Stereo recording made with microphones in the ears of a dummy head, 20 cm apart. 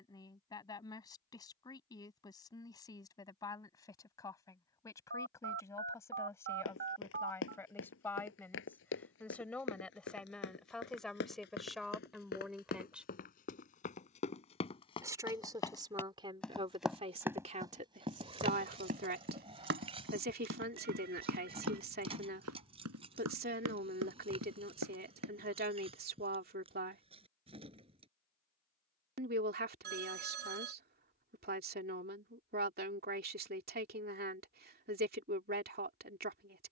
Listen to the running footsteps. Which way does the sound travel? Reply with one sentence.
You can hear the running footsteps move from left to right.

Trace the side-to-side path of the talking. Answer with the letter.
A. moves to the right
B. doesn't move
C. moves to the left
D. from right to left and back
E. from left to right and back
A.